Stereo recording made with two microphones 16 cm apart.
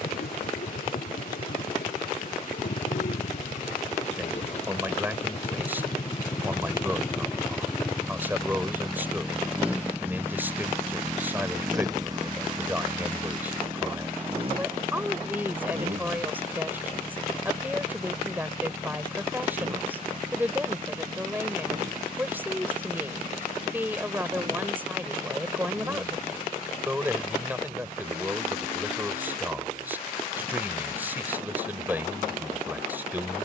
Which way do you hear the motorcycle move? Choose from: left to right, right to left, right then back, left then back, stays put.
left to right.